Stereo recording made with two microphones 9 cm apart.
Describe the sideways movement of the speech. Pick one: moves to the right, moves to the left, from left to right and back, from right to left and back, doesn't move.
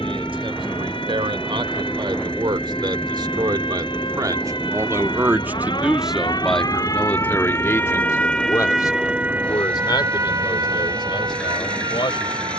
moves to the left.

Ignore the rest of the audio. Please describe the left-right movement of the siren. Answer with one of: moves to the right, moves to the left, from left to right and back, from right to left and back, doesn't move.
moves to the right.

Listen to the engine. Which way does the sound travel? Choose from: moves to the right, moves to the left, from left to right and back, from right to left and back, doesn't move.
doesn't move.